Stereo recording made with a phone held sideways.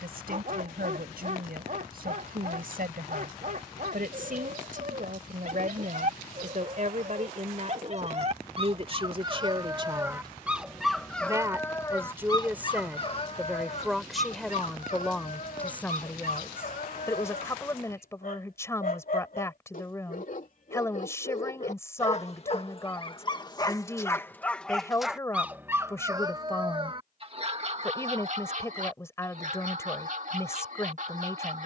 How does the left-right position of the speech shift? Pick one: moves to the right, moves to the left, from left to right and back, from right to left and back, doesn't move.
moves to the left.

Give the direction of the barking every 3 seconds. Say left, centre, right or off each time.
right, right, right, centre, left, left, left, left, centre, right, right.